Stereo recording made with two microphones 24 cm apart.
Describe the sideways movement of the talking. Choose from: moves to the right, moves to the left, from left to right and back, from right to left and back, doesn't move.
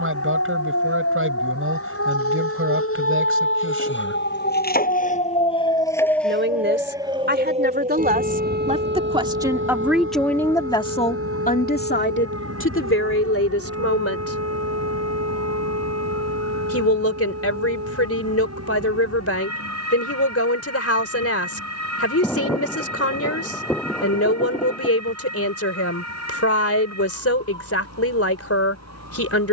moves to the left.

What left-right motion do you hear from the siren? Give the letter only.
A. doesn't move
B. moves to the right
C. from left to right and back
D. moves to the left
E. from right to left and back
B.